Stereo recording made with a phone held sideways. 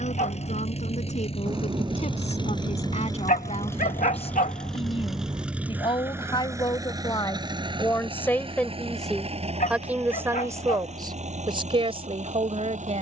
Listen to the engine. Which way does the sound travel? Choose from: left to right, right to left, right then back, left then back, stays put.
left to right.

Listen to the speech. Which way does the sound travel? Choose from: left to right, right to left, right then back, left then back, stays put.
left to right.